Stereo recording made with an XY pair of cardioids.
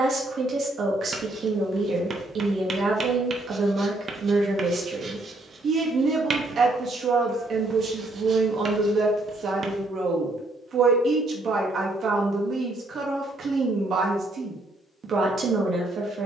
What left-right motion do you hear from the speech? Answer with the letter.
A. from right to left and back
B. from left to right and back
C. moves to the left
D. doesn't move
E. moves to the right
D.